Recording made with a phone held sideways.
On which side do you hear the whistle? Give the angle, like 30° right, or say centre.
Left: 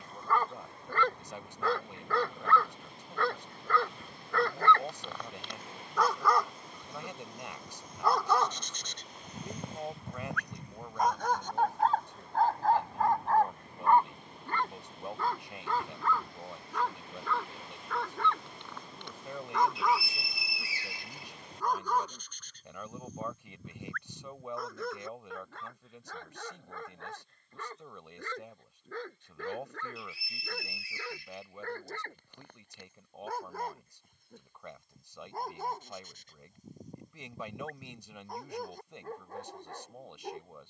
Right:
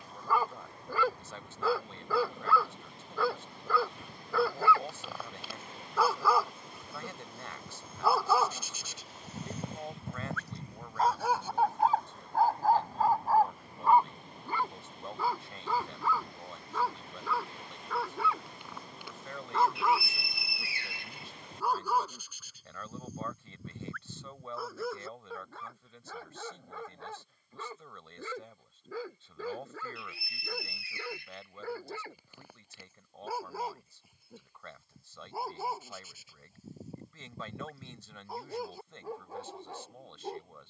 60° right.